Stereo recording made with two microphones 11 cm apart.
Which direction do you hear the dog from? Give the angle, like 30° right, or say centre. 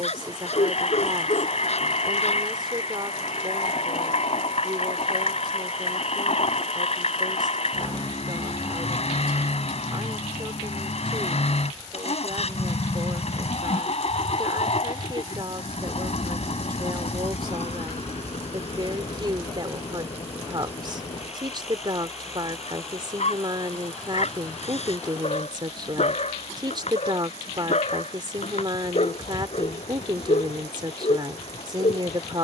80° left.